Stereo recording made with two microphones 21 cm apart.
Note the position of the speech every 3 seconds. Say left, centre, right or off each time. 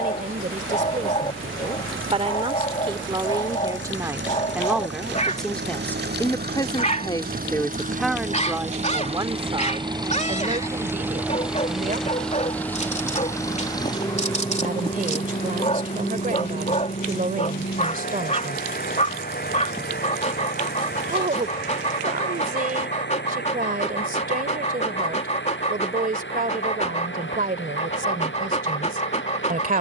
right, centre, centre, right, right, right, right, right, right, right.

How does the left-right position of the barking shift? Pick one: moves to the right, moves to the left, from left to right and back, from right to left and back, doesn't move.
doesn't move.